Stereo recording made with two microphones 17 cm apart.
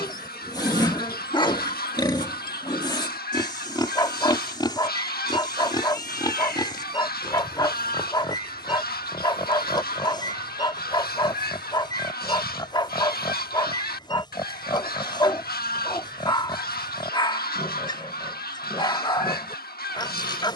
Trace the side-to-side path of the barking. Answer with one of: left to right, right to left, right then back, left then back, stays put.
stays put.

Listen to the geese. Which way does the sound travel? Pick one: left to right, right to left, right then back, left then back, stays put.
stays put.